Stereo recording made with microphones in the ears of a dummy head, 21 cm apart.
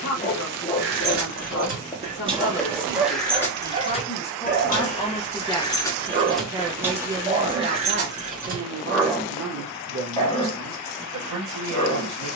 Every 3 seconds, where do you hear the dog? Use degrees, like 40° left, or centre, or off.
20° left, 30° right, 20° right, 20° left.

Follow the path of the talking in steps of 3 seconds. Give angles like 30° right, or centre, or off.
50° left, 20° left, 30° right, 60° right.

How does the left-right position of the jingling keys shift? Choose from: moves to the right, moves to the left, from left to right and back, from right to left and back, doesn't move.
from right to left and back.